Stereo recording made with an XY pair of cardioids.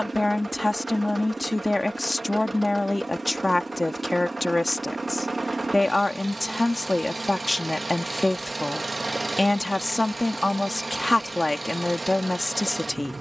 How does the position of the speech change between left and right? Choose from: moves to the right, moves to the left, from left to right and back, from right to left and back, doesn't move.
doesn't move.